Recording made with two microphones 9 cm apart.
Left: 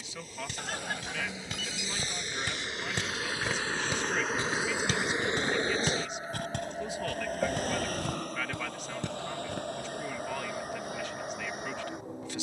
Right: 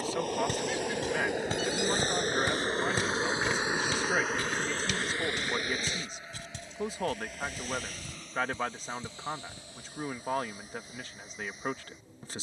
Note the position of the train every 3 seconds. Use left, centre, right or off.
right, centre, left, left.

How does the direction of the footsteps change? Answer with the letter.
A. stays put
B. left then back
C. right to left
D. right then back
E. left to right
C.